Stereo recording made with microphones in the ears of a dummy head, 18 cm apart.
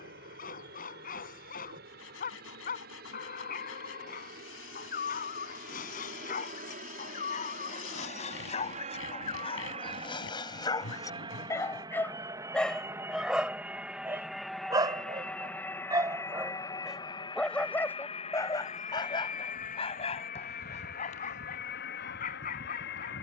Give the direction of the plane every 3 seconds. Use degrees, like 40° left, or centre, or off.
60° right, 50° right, 40° right, 30° right, 10° right, 20° left, 40° left, 50° left.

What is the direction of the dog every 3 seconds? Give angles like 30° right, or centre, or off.
40° left, 40° left, 40° left, 20° left, 10° right, 10° right, 30° left, 40° left.